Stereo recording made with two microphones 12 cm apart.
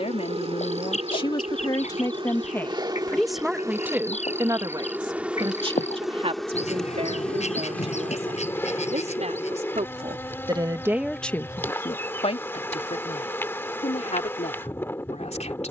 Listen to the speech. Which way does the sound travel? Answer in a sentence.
You can hear the speech go right and come back.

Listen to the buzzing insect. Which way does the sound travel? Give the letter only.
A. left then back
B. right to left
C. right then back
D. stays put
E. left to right
B.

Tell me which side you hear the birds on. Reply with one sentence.
In this clip you hear the birds on the left.